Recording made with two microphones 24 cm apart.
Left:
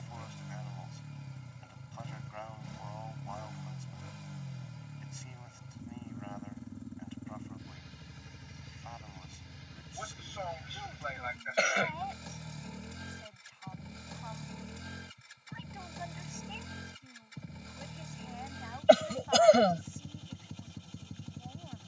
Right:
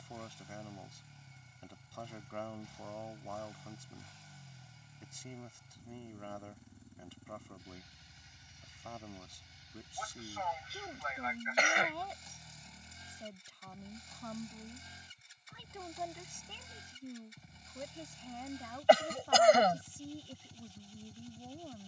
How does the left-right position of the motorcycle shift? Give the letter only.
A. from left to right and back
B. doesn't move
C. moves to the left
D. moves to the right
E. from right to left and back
B.